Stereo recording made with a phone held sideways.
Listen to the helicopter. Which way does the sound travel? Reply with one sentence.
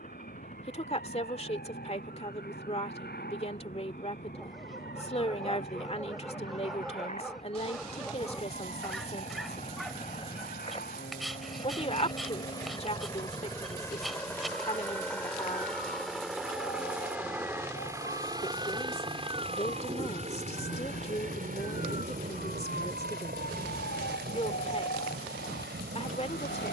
You can hear the helicopter move to the right.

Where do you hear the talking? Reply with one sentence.
You can hear the talking on the left.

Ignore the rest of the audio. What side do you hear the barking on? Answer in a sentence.
In this clip you hear the barking in the centre.